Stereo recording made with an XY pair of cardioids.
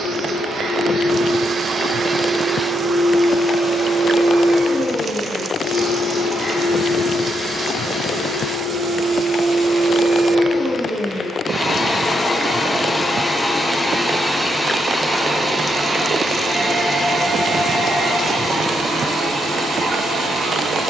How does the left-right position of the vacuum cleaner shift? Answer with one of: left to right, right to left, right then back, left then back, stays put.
left then back.